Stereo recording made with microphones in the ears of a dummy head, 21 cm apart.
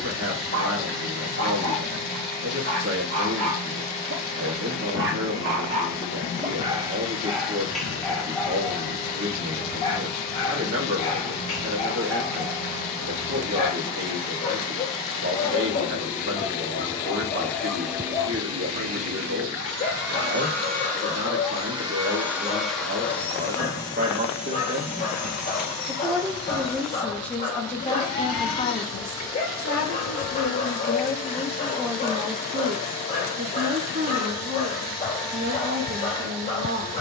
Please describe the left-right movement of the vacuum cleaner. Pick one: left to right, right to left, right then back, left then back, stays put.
right then back.